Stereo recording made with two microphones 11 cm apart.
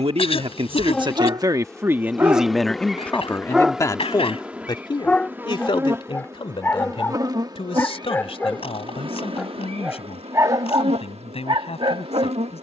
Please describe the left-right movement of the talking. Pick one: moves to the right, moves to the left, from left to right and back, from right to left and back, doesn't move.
moves to the left.